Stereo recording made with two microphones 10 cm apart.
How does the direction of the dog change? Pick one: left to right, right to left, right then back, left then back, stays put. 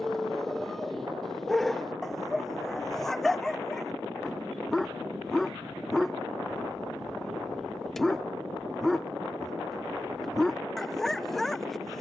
stays put.